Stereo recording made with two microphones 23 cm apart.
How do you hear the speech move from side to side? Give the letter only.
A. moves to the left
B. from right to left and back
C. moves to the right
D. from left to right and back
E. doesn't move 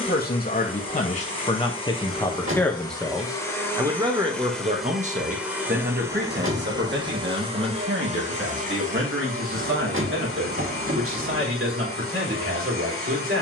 C.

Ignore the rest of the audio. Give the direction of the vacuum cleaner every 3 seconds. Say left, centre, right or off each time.
left, centre, right, right, right.